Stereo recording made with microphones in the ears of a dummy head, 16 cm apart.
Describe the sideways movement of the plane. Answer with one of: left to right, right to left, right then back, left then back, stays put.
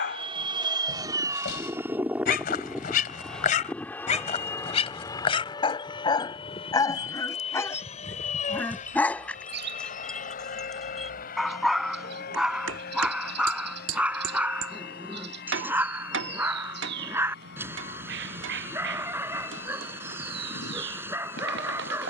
right to left.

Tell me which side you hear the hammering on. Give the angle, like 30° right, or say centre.
80° right.